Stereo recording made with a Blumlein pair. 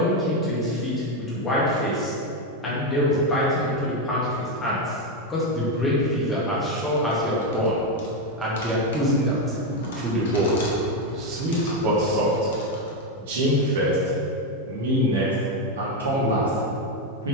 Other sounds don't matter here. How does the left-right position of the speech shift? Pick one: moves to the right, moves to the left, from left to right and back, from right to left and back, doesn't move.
moves to the right.